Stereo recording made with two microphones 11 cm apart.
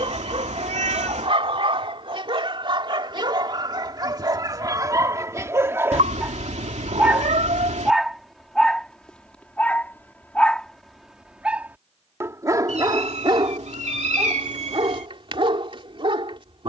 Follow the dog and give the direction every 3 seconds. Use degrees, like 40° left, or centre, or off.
50° right, 30° right, 10° right, centre, 40° right, 50° right.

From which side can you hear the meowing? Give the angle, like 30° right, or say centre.
70° right.